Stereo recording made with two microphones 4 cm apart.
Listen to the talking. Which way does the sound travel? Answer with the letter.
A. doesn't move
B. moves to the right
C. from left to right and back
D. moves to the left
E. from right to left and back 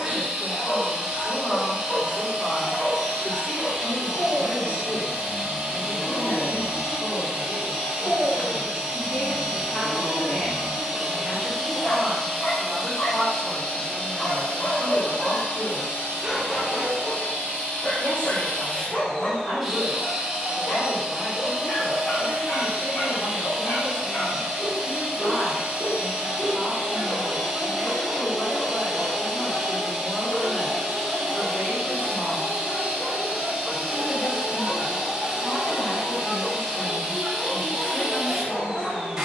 C.